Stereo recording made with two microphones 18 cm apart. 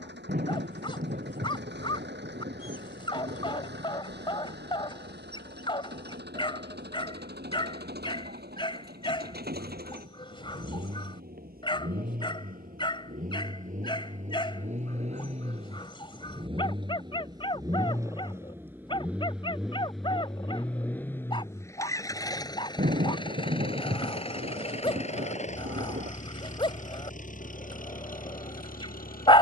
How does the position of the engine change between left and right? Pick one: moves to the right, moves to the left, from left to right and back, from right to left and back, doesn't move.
moves to the left.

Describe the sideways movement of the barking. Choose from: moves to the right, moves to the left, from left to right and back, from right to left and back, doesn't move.
doesn't move.